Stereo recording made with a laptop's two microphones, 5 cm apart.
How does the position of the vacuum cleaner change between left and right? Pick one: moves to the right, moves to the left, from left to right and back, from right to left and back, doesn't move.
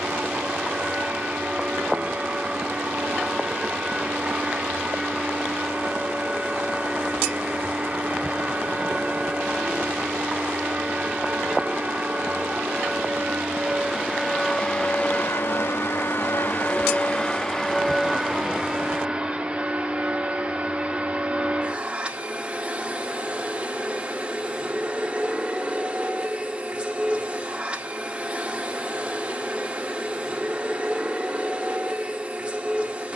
from right to left and back.